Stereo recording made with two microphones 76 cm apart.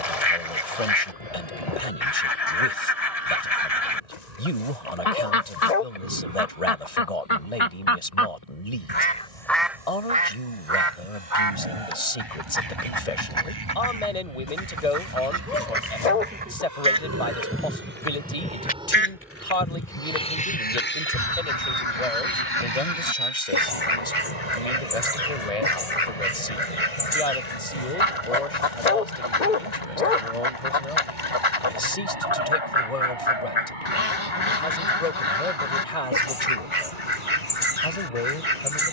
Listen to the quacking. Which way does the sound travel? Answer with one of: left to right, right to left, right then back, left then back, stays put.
right then back.